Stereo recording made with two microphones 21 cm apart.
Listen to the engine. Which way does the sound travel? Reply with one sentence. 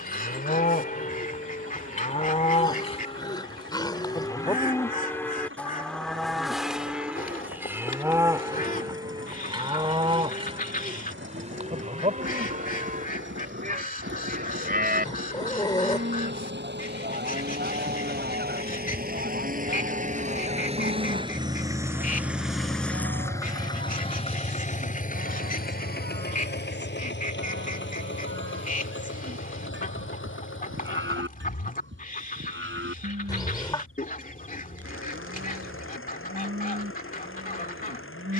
You can hear the engine go from the right side to the left.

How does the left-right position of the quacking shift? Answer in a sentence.
In this clip you hear the quacking stay put.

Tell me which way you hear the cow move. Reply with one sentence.
You can hear the cow move from left to right.